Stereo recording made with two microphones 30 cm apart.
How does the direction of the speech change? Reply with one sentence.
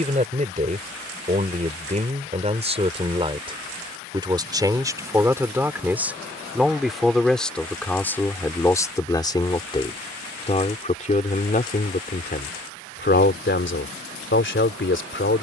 In this clip you hear the speech move to the left.